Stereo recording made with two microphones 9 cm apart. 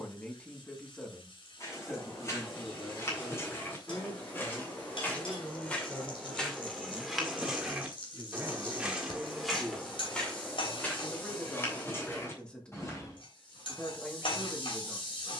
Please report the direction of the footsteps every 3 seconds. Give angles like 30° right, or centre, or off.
30° left, 20° left, centre, 10° left, 30° left.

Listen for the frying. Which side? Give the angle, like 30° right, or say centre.
70° left.